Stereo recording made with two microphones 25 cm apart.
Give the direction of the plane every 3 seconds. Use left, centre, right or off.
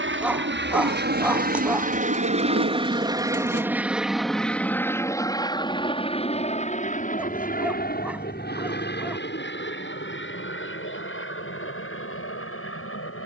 right, centre, left, left, left.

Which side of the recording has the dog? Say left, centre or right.
centre.